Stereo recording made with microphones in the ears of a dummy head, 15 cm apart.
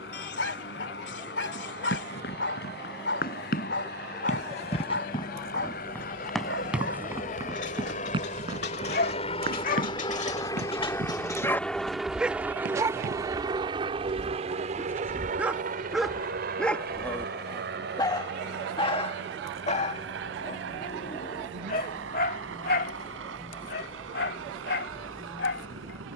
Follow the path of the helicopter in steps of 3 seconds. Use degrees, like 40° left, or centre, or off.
70° left, 60° left, 50° left, 20° left, 20° right, 50° right, 70° right, 80° right, 80° right.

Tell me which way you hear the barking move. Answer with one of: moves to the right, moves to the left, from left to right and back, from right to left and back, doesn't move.
from left to right and back.